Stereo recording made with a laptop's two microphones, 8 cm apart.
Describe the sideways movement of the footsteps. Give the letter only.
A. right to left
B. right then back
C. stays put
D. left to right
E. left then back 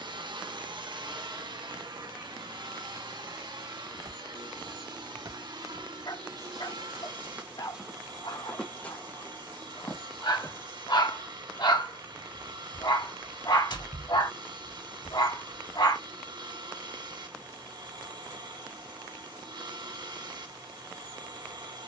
A.